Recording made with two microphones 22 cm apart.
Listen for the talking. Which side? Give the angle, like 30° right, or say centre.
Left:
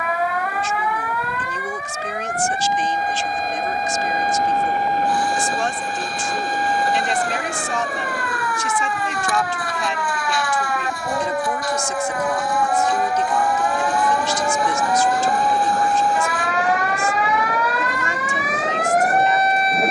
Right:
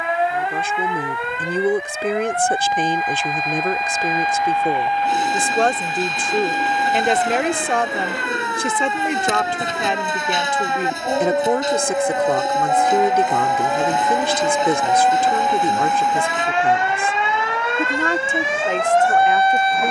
60° right.